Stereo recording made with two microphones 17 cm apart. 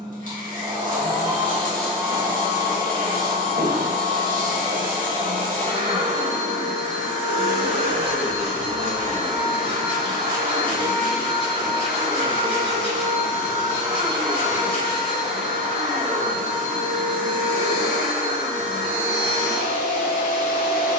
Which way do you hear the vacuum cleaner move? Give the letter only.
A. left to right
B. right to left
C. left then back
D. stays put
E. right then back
D.